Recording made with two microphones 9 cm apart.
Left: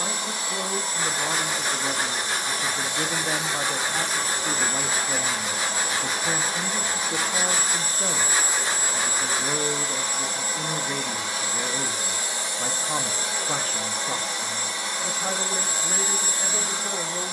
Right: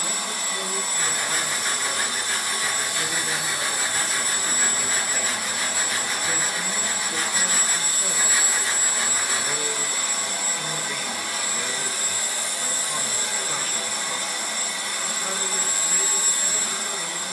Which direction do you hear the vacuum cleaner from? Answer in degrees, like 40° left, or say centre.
20° left.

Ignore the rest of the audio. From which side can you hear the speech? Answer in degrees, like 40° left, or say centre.
40° left.